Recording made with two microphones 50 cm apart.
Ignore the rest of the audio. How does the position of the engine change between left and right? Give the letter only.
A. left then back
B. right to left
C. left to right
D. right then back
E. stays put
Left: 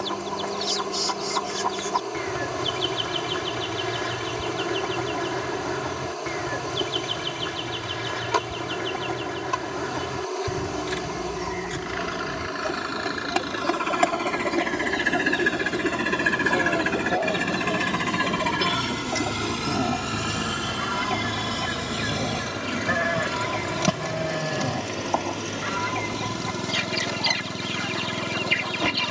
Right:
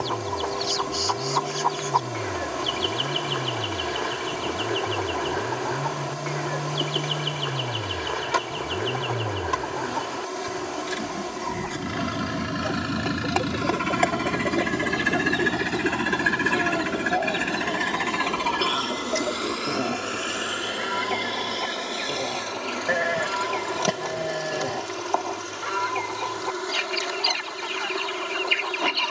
B.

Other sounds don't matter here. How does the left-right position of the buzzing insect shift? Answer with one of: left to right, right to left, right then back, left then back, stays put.
right to left.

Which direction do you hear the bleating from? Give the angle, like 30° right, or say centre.
30° left.